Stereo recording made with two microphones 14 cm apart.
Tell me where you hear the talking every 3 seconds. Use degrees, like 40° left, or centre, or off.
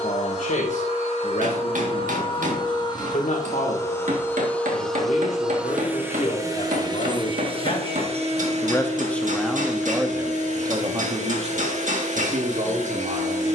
60° left, 60° left, 40° left, 20° right, 60° right.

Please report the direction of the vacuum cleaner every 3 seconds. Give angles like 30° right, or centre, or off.
40° left, 10° left, 40° right, 60° right, 60° right.